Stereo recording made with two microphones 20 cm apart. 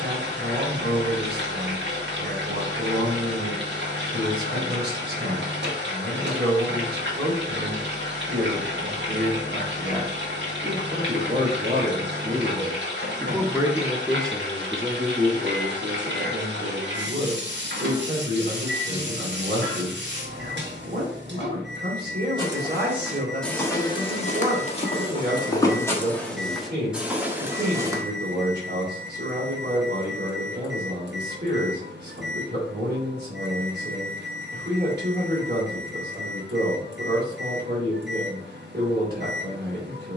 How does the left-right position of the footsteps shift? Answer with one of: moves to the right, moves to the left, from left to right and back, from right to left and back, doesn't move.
from right to left and back.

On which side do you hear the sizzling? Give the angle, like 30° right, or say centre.
80° right.